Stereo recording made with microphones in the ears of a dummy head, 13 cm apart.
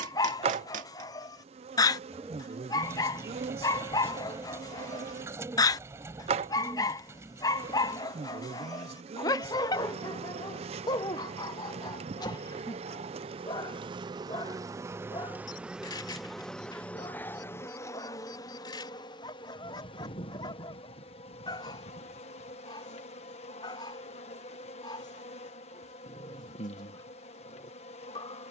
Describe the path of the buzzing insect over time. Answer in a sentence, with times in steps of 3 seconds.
In this clip you hear the buzzing insect on the right from 0 s, in the centre from 15 s and on the left from 18 s.